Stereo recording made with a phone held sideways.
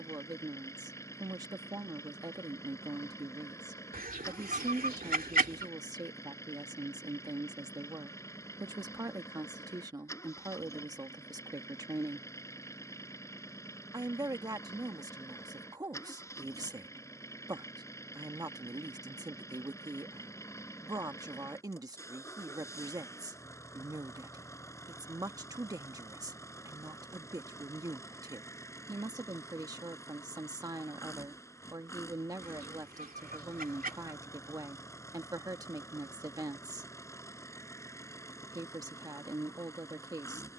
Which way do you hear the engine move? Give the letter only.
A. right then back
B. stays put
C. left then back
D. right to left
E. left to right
B.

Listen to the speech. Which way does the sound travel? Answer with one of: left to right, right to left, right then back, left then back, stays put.
stays put.